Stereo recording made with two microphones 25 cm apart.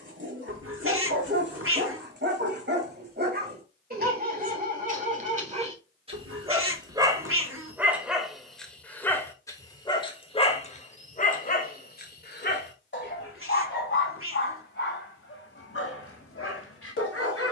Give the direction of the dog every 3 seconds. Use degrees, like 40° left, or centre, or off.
50° right, 30° right, 10° right, 30° left, 50° left, 60° left.